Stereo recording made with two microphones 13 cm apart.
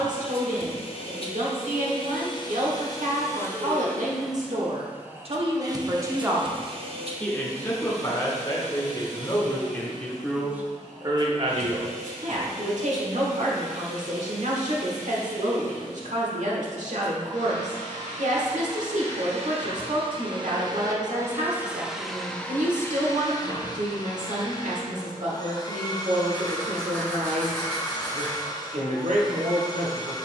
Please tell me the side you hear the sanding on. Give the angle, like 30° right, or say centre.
10° left.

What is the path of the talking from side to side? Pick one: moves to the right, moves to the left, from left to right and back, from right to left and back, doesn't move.
from right to left and back.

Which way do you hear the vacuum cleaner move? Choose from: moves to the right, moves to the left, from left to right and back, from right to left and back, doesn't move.
from left to right and back.